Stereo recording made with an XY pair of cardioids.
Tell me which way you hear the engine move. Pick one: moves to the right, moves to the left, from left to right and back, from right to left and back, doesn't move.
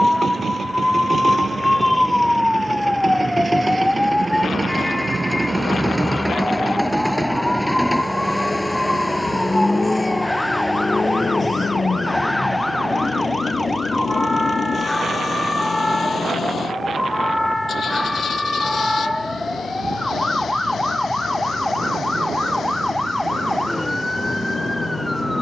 moves to the left.